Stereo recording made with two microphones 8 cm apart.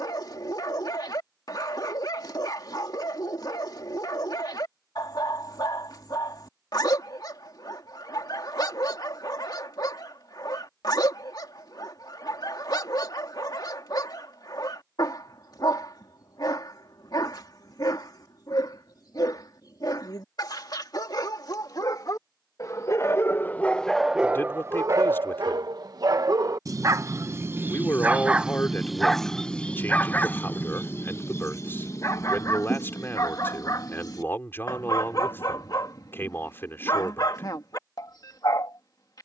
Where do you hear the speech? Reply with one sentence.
You can hear the speech on the left.